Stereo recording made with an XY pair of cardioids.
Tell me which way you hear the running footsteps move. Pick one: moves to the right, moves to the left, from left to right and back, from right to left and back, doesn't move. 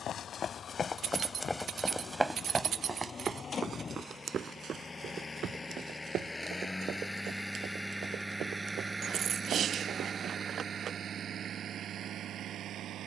moves to the right.